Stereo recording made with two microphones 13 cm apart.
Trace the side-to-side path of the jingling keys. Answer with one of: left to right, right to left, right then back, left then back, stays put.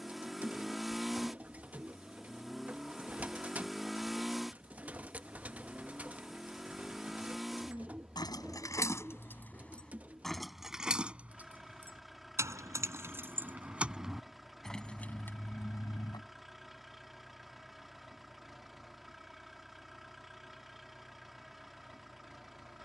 right then back.